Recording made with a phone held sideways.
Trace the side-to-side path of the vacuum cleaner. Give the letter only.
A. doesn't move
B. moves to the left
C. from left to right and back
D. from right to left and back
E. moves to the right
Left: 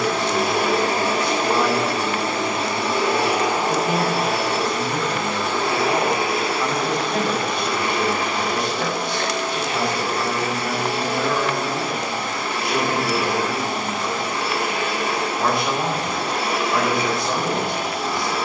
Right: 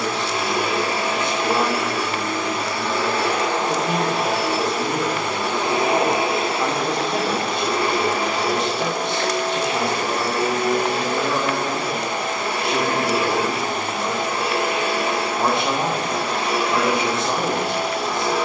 E.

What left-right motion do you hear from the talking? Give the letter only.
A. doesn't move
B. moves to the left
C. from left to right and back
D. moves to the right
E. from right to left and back
A.